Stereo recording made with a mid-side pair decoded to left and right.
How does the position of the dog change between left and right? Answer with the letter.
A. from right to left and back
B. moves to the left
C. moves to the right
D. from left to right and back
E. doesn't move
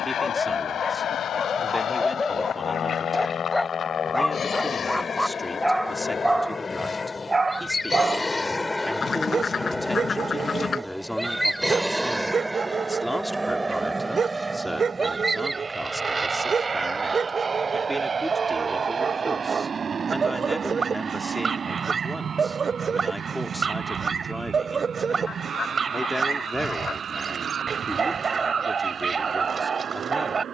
C.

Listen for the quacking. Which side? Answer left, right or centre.
left.